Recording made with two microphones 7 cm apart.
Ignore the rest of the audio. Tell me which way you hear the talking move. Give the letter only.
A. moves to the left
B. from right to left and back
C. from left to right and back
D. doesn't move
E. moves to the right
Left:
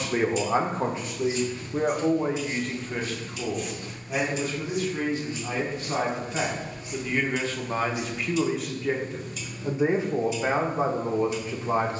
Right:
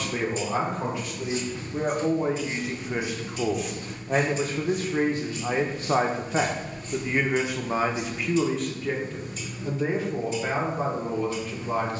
C.